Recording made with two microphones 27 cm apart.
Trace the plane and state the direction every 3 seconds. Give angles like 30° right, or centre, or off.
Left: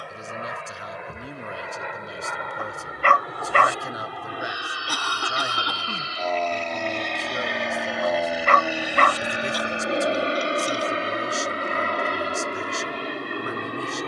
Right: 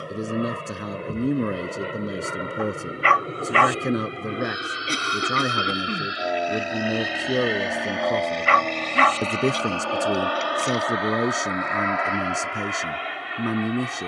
40° right, 30° right, centre, 30° left, 50° left.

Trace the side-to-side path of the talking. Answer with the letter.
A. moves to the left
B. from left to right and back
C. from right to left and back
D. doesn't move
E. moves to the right
D.